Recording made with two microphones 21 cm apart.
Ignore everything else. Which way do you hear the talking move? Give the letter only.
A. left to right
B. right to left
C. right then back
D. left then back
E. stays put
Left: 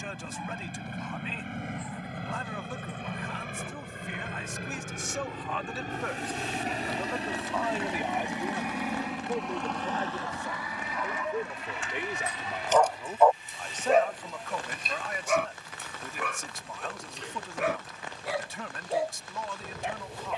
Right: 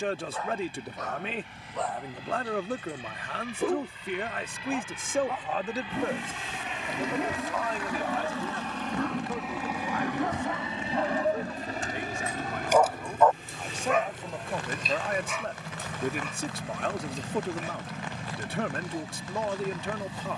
D.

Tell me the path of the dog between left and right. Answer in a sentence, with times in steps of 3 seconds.
You can hear the dog on the right from 0 s and on the left from 12 s.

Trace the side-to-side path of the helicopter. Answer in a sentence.
You can hear the helicopter go from the left side to the right.